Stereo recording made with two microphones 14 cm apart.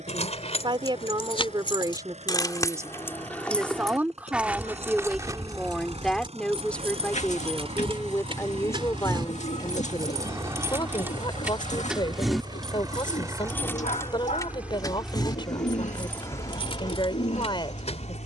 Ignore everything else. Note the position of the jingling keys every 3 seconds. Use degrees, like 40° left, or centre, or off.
40° left, 10° right, 40° right, 20° right, 10° left, 40° left.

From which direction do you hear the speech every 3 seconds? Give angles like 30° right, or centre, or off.
30° right, 10° right, 10° left, 30° left, 30° left, 30° left.